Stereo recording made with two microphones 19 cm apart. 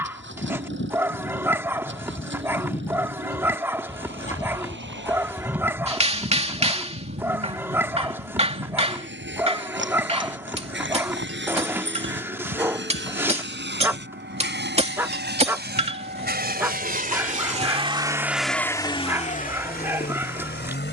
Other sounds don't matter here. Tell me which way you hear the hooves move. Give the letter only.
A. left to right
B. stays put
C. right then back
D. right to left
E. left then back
A.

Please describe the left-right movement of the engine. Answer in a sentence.
In this clip you hear the engine travel towards the left.